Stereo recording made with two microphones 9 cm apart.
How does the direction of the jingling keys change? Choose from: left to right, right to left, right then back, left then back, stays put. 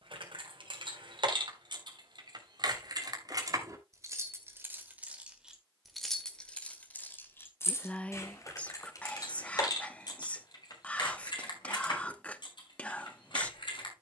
right to left.